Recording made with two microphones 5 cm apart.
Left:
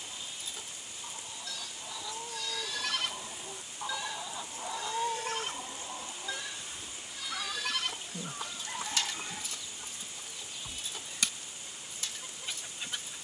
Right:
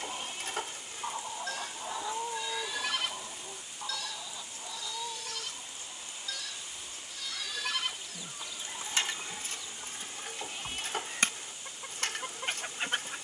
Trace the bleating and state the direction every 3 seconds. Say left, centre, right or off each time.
right, left, centre, right, right.